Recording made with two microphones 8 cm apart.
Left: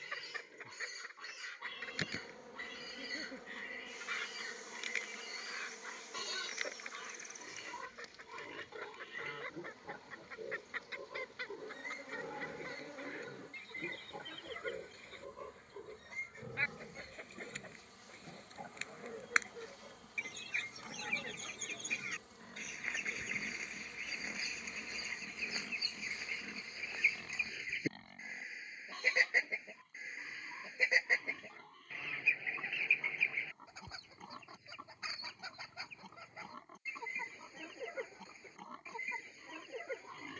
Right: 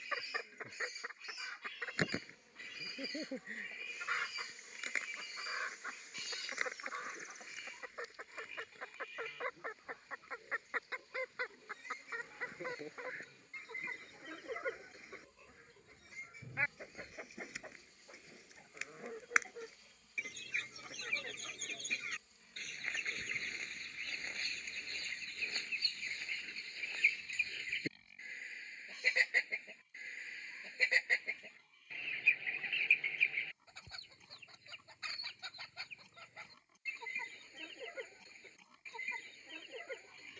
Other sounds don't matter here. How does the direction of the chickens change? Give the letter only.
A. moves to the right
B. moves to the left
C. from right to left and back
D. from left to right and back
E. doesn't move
B.